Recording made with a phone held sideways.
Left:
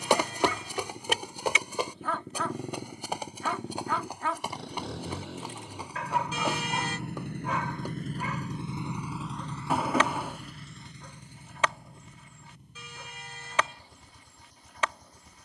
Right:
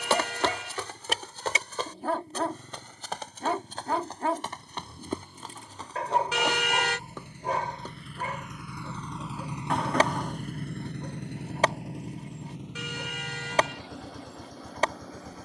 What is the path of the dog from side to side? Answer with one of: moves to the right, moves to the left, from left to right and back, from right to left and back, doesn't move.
doesn't move.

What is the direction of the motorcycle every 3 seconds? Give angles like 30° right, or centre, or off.
80° left, 70° left, 50° left, 40° right, 70° right.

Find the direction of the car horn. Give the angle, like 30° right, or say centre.
70° right.